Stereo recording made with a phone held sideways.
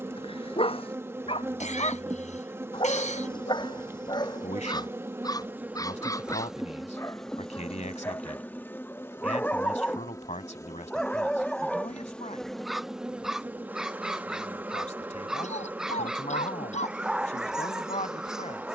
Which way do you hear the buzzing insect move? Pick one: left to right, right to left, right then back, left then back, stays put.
left then back.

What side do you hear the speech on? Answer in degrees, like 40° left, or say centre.
60° left.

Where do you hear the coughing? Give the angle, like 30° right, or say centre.
60° left.